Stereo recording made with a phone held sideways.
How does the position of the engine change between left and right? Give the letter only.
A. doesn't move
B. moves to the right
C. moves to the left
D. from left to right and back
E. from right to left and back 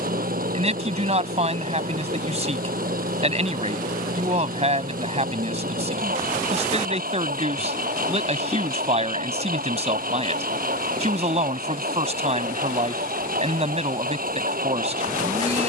A.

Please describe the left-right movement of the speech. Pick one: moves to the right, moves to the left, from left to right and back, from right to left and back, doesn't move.
doesn't move.